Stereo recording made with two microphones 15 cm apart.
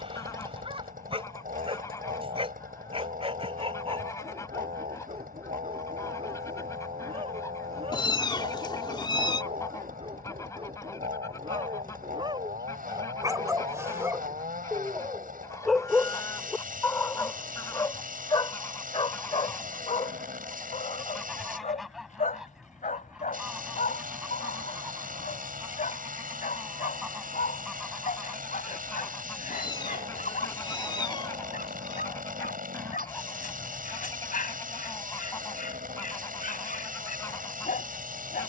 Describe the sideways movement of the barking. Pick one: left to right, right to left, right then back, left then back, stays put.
right to left.